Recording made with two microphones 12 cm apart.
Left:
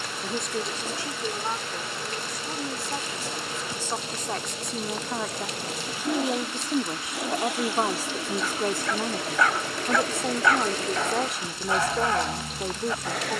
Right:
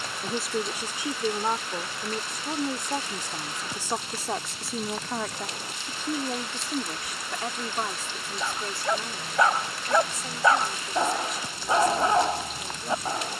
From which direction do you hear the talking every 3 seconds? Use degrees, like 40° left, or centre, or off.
20° right, 10° right, 30° left, 60° left, 60° left.